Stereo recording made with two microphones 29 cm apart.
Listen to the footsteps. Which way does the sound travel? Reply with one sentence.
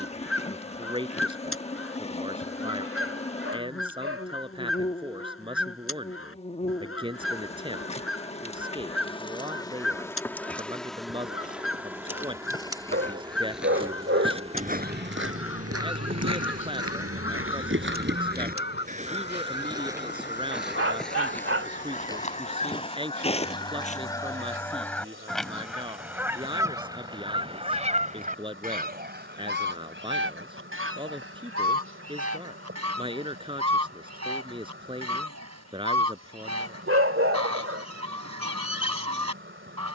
You can hear the footsteps go right and come back.